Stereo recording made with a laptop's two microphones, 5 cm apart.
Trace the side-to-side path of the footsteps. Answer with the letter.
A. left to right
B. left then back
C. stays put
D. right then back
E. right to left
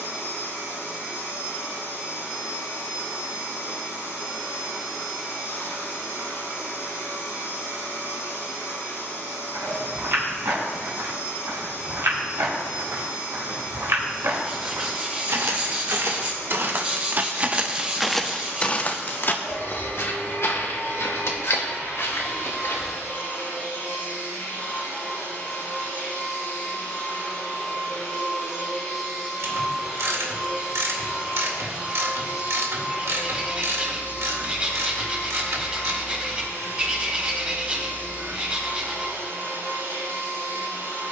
E.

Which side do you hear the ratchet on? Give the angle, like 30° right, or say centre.
70° right.